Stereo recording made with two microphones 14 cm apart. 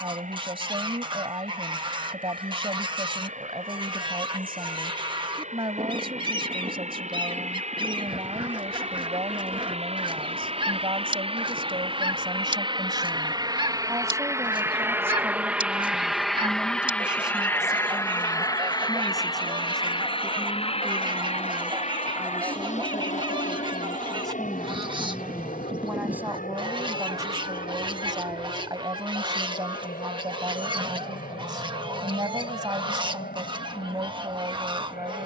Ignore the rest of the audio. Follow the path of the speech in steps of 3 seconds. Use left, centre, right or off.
right, right, right, right, right, centre, centre, centre, centre, right, right, right.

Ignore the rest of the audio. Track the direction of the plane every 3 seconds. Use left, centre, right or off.
right, right, right, right, right, centre, left, left, left, left, left, left.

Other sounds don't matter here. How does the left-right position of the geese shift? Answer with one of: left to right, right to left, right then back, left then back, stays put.
stays put.